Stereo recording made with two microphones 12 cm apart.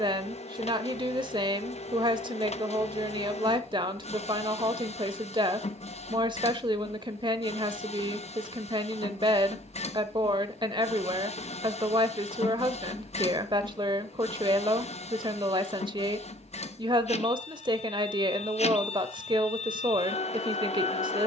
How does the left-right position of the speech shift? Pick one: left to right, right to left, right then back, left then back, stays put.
stays put.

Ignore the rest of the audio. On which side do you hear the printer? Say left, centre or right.
left.